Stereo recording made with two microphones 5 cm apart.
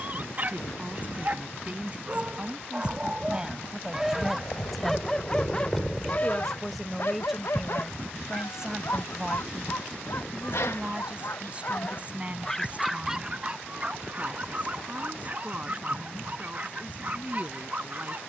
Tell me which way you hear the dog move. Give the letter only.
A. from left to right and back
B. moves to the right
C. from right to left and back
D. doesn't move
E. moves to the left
C.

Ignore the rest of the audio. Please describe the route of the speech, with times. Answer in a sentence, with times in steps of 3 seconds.
In this clip you hear the speech on the right from 0 s, in the centre from 3 s and on the right from 9 s.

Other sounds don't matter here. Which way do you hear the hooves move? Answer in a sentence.
In this clip you hear the hooves move to the right.